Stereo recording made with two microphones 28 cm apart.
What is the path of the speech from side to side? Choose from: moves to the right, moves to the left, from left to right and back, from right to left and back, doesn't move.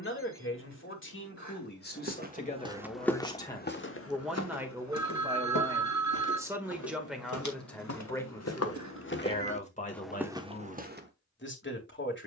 from left to right and back.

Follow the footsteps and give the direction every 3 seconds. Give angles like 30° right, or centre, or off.
20° right, 50° left, 70° left, centre.